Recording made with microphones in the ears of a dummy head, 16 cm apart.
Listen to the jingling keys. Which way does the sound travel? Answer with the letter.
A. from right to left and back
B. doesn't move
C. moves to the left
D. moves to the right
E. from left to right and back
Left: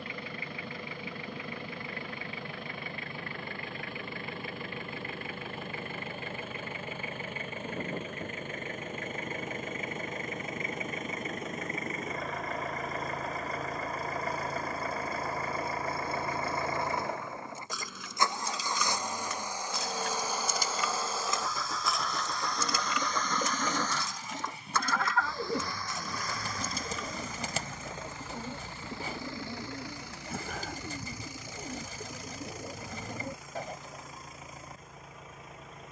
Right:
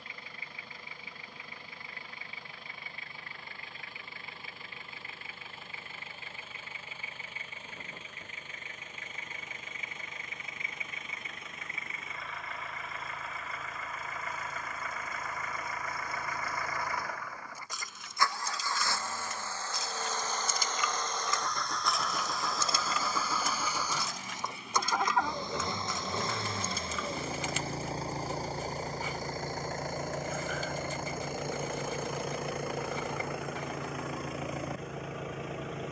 D.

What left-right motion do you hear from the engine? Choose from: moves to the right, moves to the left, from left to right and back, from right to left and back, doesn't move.
moves to the right.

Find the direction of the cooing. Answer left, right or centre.
left.